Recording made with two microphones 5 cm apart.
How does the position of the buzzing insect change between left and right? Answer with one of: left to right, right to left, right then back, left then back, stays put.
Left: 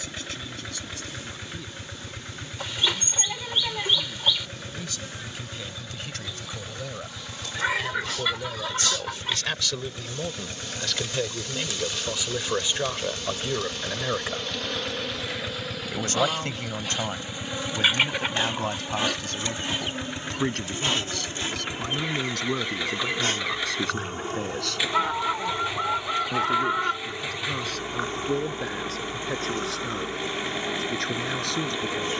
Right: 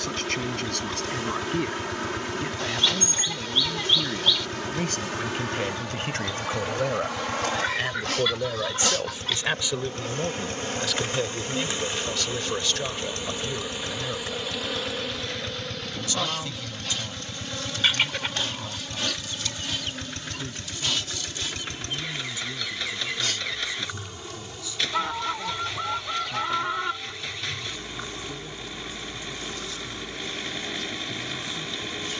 right to left.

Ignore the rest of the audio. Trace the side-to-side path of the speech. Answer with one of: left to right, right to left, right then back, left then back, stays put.
right to left.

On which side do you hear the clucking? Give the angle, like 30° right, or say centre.
10° left.